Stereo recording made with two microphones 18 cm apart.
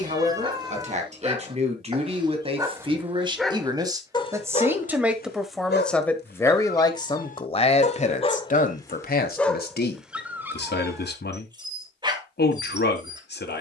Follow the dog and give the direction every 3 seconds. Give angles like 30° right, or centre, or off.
20° right, 30° left, 40° left, 10° right, 20° right.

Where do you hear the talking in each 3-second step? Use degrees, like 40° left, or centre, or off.
40° right, 10° right, 30° left, 60° left, 60° left.